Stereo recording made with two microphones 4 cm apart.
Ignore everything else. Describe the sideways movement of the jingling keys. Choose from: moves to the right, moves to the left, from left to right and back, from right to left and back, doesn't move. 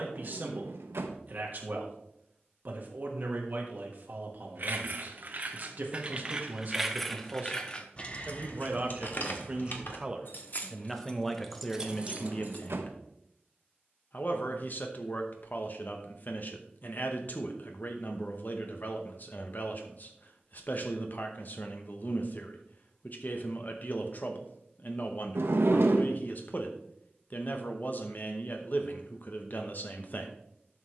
from right to left and back.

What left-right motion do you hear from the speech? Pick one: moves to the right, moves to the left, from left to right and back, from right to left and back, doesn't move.
moves to the left.